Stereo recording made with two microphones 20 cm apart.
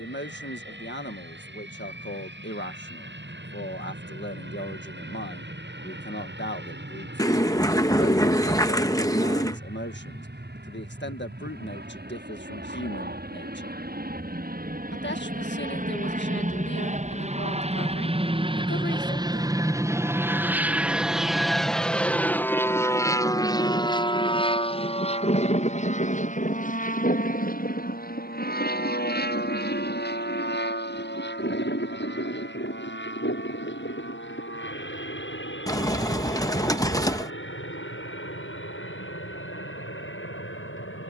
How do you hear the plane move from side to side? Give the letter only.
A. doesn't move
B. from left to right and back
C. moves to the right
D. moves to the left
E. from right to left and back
D.